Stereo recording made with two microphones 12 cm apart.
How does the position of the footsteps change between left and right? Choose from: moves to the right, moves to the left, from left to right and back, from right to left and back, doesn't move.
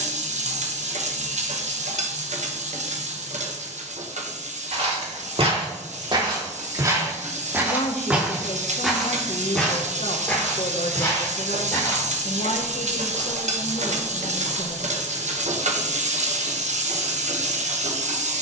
moves to the left.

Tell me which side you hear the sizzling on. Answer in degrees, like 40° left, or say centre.
70° right.